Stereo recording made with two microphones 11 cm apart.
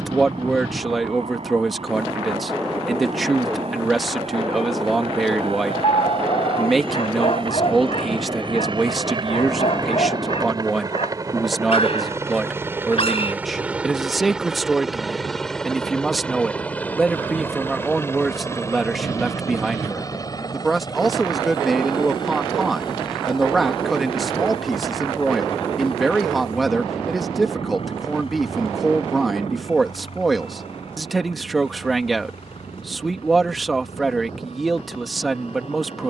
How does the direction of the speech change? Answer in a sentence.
In this clip you hear the speech stay in one place.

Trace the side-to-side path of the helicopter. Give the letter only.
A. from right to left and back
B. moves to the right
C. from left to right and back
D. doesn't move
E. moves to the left
E.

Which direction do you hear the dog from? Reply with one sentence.
You can hear the dog on the left.